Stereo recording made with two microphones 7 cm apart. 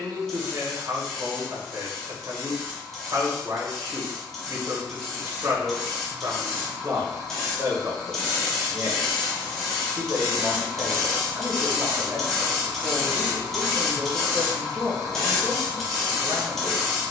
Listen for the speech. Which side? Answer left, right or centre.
right.